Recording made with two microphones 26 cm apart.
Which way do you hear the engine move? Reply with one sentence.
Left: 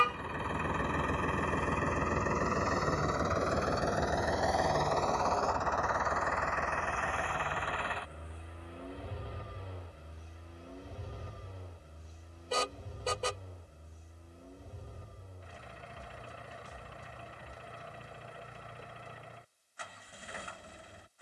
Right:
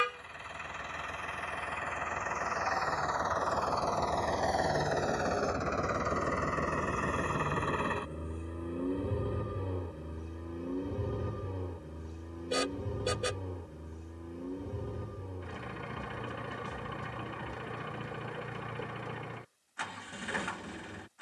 You can hear the engine move from left to right.